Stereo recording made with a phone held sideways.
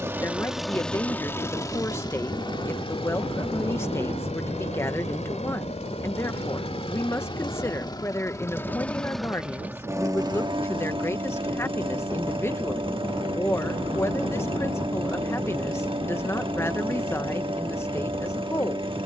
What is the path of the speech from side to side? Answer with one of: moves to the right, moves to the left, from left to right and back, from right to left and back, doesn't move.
doesn't move.